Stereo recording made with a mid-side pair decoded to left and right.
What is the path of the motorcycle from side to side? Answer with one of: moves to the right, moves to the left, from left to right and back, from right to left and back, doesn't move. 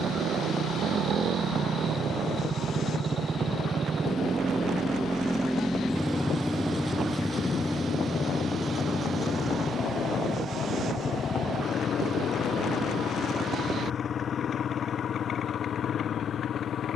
moves to the left.